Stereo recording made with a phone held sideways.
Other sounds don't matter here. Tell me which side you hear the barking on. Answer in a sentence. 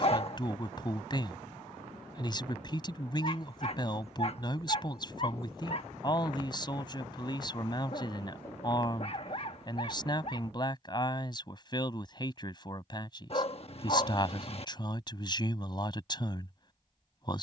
In this clip you hear the barking on the left.